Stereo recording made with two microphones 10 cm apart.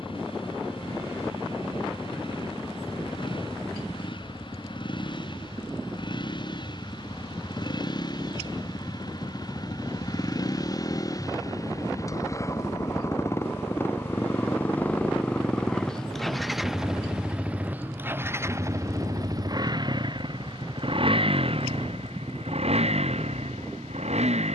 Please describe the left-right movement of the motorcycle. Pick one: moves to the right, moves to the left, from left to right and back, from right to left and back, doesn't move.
moves to the right.